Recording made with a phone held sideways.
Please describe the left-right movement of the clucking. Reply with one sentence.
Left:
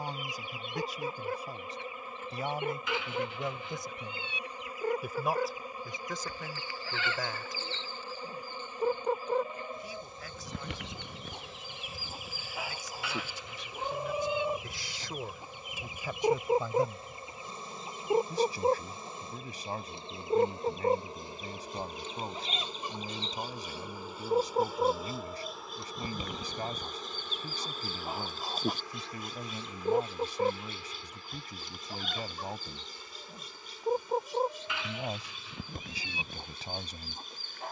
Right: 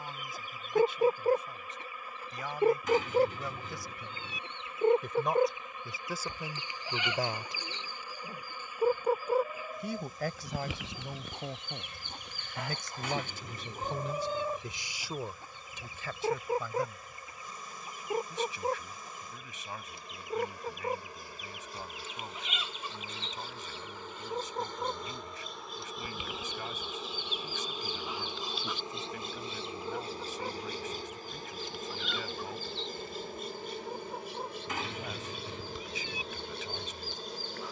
You can hear the clucking move to the left.